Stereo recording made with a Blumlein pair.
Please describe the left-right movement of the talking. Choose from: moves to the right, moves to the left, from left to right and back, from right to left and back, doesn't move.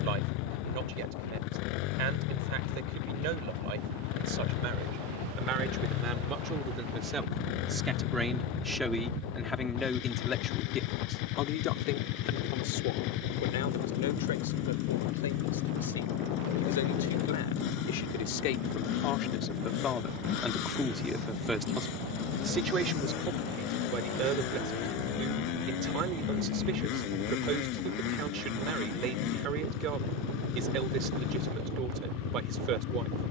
from right to left and back.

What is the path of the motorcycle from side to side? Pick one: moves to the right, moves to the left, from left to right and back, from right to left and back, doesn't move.
doesn't move.